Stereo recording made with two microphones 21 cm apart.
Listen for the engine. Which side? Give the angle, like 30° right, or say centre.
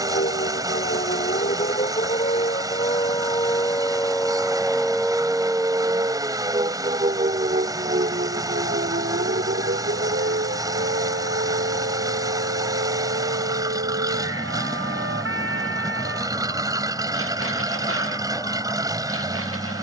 20° right.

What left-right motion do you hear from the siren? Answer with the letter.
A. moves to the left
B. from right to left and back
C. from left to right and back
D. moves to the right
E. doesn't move
D.